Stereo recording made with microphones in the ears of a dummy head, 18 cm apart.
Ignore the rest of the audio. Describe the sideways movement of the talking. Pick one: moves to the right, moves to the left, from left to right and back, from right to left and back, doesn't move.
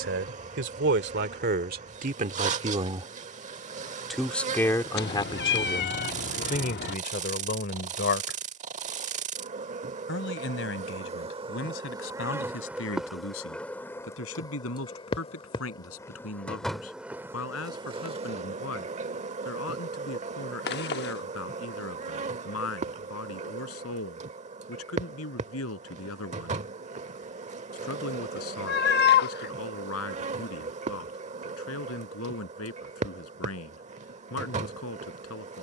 moves to the left.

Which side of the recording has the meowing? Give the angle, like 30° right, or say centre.
50° left.